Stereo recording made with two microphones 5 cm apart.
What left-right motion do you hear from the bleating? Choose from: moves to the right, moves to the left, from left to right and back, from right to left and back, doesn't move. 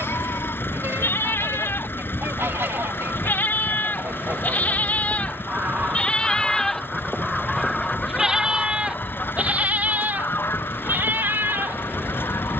moves to the right.